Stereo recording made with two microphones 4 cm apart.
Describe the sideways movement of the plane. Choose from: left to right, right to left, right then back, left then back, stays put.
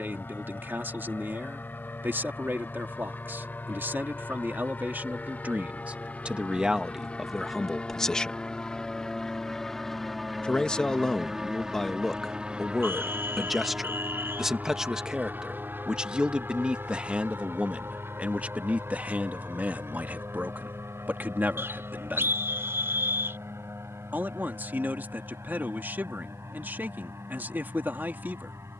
left to right.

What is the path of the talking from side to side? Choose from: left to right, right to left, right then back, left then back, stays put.
left then back.